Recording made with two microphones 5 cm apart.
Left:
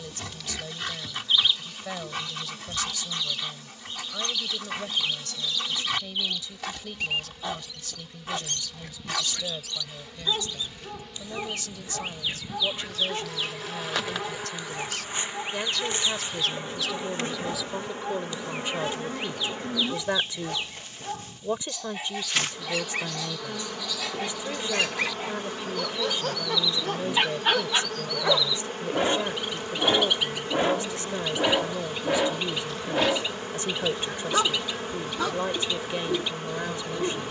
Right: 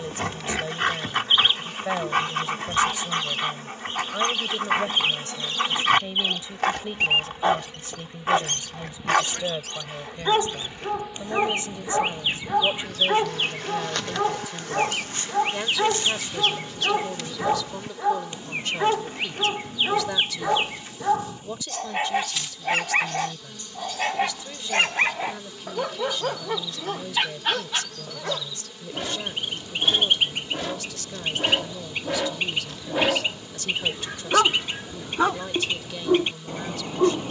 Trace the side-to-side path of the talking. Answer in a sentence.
In this clip you hear the talking move to the left.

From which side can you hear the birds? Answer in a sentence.
In this clip you hear the birds on the right.